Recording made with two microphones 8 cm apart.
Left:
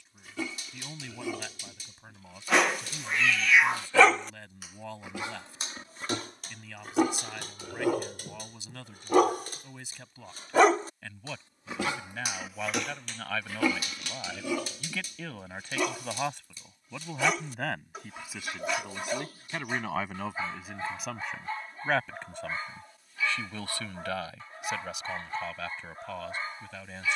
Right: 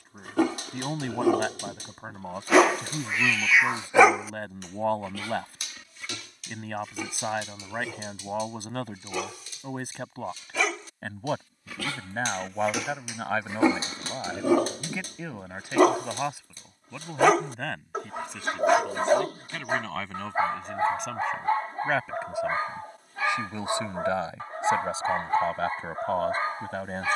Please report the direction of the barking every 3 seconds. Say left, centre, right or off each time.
right, centre, left, left, right, right, right, right, right.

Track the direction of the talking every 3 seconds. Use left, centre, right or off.
right, right, right, right, right, centre, centre, centre, right.